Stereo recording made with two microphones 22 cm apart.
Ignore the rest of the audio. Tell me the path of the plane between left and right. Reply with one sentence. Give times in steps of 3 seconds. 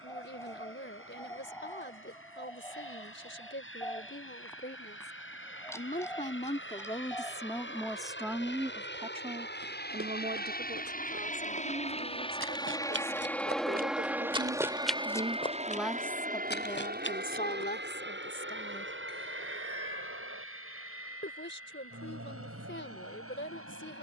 In this clip you hear the plane on the left from 0 s, in the centre from 12 s and on the right from 15 s.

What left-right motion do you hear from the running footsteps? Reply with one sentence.
In this clip you hear the running footsteps go from the right side to the left.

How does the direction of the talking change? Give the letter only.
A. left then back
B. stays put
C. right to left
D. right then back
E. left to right
D.